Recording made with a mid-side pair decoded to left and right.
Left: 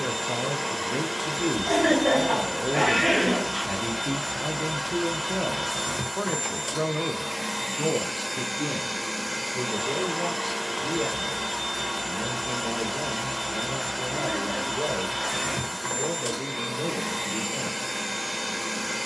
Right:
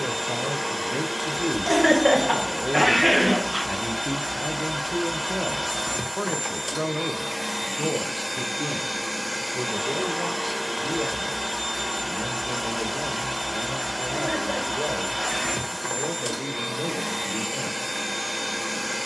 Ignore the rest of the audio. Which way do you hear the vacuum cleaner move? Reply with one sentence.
In this clip you hear the vacuum cleaner stay in one place.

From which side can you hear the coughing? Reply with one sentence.
You can hear the coughing on the right.